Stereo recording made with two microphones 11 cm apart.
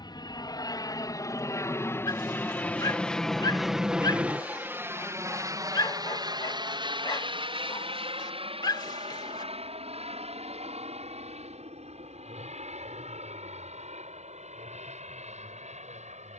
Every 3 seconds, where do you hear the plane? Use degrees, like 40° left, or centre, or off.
30° left, 10° right, 50° right, 60° right, 70° right, 70° right.